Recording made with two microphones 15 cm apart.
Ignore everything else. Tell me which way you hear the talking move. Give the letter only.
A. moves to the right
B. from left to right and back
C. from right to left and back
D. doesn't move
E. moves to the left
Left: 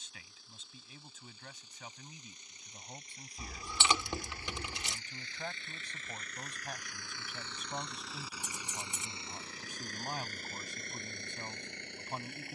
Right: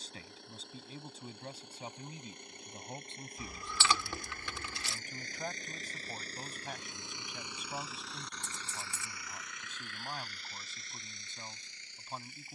E.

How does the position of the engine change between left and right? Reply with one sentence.
You can hear the engine move from right to left.